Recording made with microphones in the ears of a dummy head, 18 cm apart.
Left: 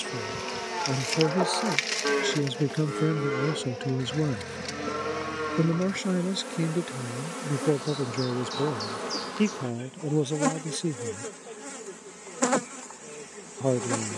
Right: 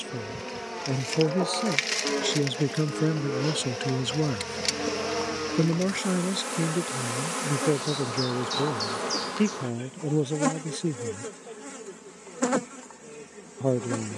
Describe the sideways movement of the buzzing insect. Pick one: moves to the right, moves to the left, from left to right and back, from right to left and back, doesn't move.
from left to right and back.